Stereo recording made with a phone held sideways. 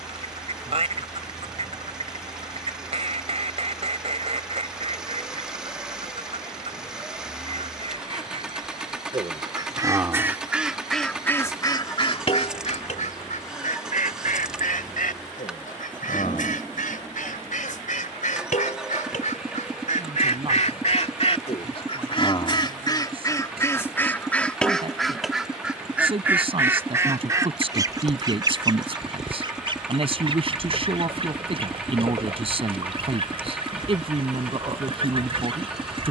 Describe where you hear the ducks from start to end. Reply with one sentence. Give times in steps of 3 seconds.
In this clip you hear the ducks on the right from 0 s, in the centre from 9 s, on the left from 12 s, in the centre from 24 s and on the right from 27 s.